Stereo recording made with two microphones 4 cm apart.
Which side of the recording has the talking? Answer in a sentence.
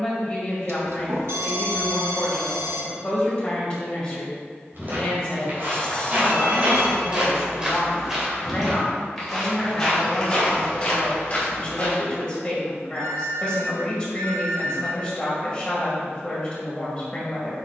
You can hear the talking on the left.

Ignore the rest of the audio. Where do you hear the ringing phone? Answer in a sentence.
In this clip you hear the ringing phone on the right.